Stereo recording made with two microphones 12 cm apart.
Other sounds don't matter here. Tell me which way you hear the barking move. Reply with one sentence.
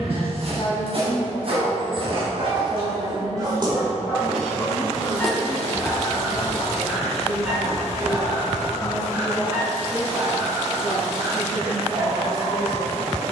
In this clip you hear the barking go left and come back.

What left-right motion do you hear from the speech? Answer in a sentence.
In this clip you hear the speech move from left to right and back again.